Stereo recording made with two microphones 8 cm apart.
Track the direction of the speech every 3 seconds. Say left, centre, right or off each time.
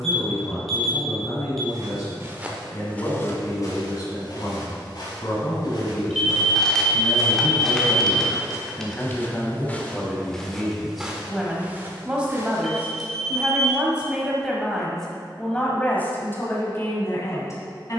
left, left, left, centre, centre, left.